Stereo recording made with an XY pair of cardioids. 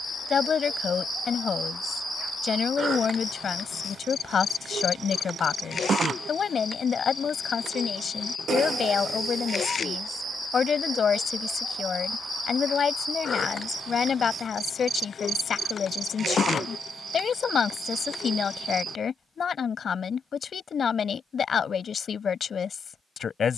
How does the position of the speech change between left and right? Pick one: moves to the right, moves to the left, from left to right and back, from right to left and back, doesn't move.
doesn't move.